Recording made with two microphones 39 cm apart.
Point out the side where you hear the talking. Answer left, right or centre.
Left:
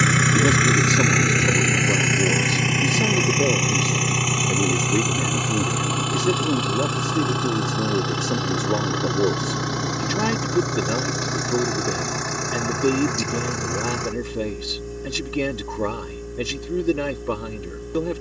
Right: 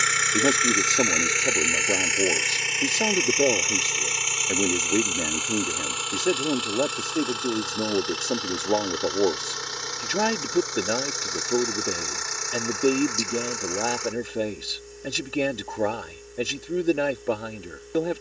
centre.